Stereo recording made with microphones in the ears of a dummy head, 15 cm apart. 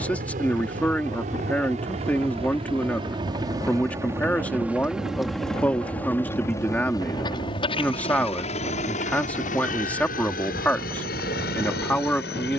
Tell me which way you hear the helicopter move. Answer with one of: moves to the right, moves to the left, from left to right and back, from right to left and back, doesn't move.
moves to the left.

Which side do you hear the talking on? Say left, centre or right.
centre.